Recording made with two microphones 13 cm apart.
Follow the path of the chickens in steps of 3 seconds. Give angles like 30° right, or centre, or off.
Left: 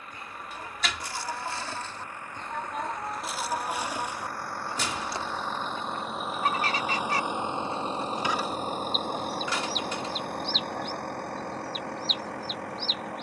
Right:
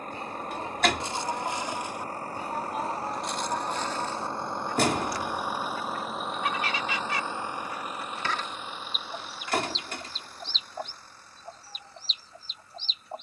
20° right, 10° left, 30° left, 30° right, 40° right.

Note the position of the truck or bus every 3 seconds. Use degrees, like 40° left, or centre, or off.
40° right, 20° right, 20° left, 60° left, 80° left.